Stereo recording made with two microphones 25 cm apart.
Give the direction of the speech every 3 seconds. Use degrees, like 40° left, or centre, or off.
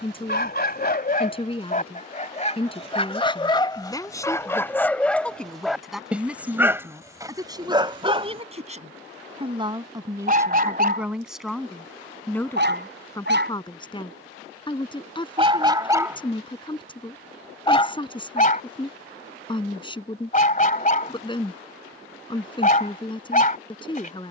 20° left, 10° left, 10° right, 10° right, 10° left, 20° left, 20° left, 20° left.